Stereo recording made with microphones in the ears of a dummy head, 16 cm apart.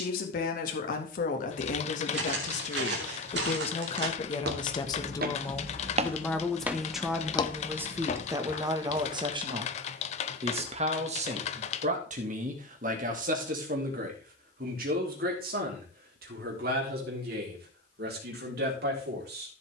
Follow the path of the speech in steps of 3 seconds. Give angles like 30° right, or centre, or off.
50° left, 30° left, 10° right, 40° right, 50° right, 60° right, 70° right.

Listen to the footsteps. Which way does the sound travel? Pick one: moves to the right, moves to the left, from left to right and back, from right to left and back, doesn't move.
moves to the left.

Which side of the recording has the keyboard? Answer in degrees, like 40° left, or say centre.
40° left.